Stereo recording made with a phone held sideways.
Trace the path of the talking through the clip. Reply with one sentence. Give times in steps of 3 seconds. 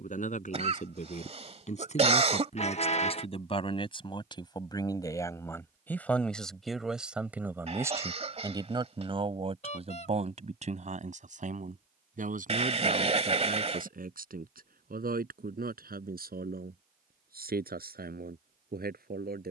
In this clip you hear the talking on the left from 0 s, in the centre from 6 s and on the right from 9 s.